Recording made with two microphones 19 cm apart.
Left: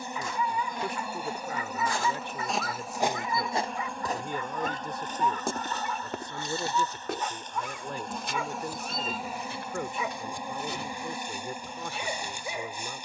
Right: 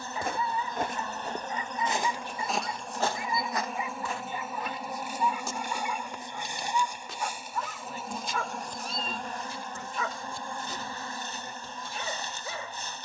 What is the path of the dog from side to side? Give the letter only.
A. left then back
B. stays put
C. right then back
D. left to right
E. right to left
E.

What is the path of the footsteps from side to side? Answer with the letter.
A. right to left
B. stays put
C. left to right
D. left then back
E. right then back
A.